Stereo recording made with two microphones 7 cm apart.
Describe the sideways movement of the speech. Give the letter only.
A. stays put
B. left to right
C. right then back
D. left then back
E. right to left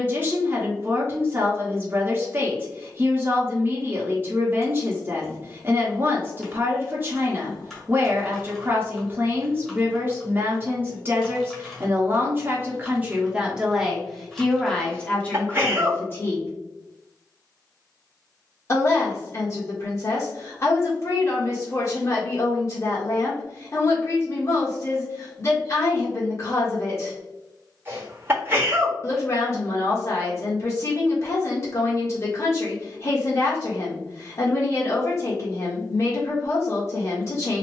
E.